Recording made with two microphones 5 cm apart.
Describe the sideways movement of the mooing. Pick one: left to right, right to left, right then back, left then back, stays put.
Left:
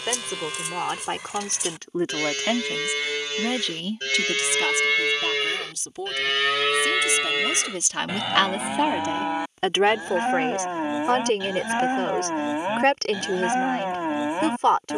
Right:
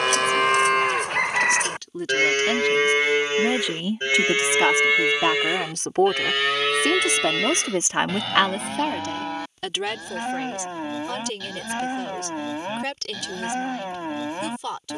right to left.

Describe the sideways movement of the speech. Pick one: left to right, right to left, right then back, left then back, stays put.
right then back.